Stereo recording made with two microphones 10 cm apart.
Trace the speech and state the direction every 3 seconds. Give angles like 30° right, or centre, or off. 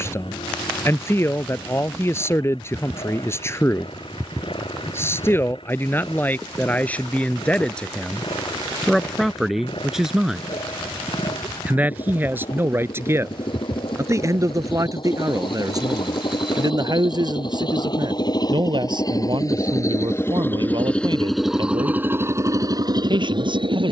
30° left, 20° left, 10° left, 10° right, 30° right, 40° right, 60° right, 60° right.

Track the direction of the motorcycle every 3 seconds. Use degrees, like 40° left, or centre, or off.
70° left, 70° left, 70° left, 70° left, 60° left, 60° left, 30° left, 30° right.